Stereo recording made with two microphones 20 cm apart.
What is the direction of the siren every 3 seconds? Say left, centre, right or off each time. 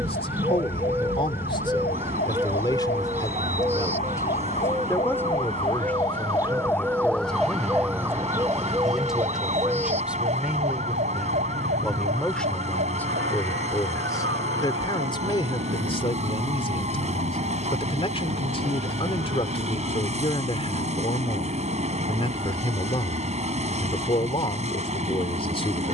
left, left, centre, right, right, right, right, right, right.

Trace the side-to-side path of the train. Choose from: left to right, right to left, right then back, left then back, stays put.
stays put.